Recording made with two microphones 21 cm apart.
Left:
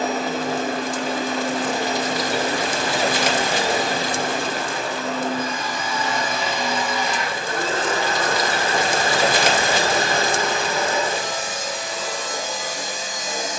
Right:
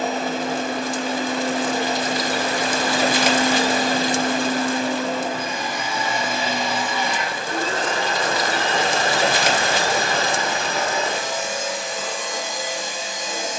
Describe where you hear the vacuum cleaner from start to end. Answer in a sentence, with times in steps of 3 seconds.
In this clip you hear the vacuum cleaner on the left from 0 s, in the centre from 3 s and on the left from 9 s.